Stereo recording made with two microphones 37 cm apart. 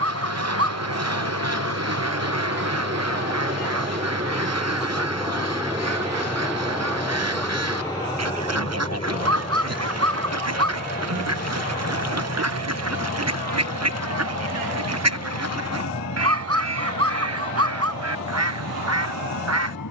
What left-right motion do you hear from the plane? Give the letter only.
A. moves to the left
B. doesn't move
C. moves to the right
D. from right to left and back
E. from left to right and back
A.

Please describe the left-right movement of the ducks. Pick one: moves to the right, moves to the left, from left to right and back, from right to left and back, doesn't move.
doesn't move.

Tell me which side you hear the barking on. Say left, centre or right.
right.